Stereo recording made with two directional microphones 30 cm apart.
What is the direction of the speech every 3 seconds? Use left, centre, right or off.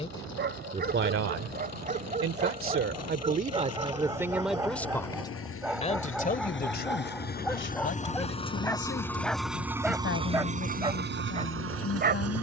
right, centre, left, left.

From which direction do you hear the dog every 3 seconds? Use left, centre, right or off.
right, centre, centre, centre.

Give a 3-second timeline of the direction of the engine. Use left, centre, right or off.
left, left, left, right.